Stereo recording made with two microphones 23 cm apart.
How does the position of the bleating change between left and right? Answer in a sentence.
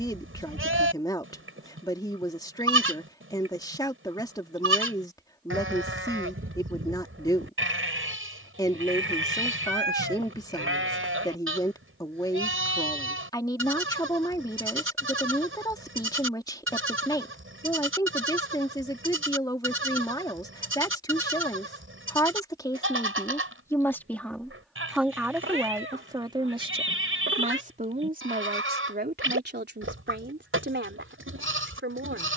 You can hear the bleating stay in one place.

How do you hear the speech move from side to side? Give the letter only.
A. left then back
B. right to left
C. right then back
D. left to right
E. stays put
D.